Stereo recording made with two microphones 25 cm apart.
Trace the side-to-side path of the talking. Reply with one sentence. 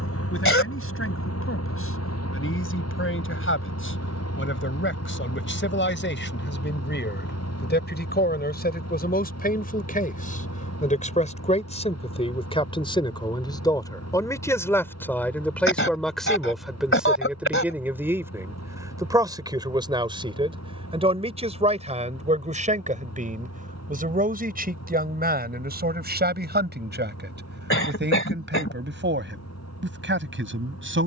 In this clip you hear the talking move from left to right.